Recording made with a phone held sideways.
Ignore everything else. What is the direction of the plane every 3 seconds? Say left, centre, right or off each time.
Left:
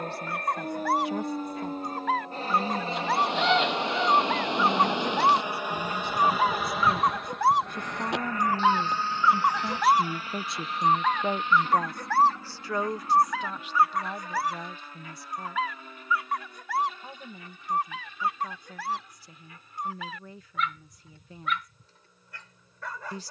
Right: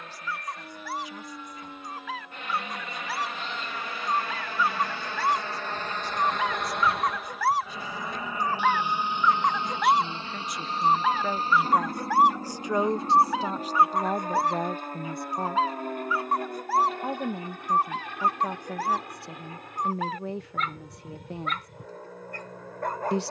left, left, centre, right, right, right, right, right.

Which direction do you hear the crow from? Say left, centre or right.
left.